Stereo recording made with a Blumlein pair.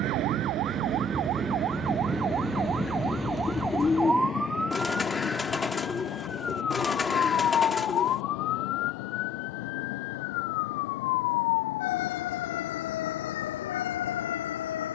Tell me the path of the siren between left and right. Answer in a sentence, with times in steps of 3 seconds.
You can hear the siren on the right from 0 s, in the centre from 3 s and on the left from 6 s.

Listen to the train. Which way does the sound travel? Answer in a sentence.
You can hear the train move from right to left.